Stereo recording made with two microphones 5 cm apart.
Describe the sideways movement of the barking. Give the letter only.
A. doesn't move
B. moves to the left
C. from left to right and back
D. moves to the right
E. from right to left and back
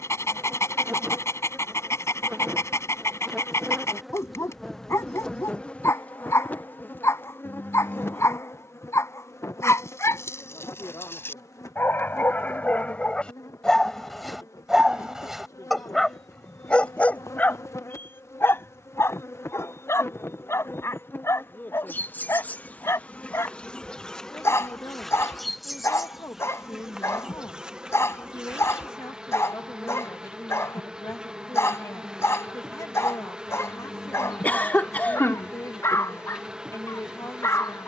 C.